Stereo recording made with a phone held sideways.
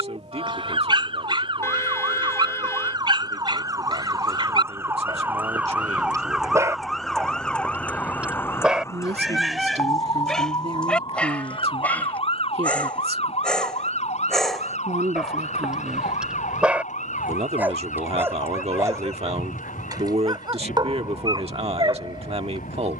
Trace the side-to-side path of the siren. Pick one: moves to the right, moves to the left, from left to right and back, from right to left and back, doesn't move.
moves to the left.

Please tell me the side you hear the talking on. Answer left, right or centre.
right.